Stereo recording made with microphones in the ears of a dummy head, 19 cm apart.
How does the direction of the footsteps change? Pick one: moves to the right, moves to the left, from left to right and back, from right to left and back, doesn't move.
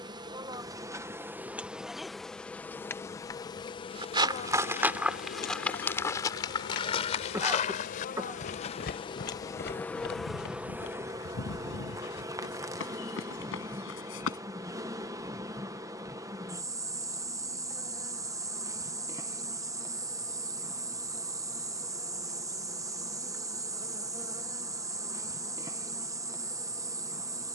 moves to the left.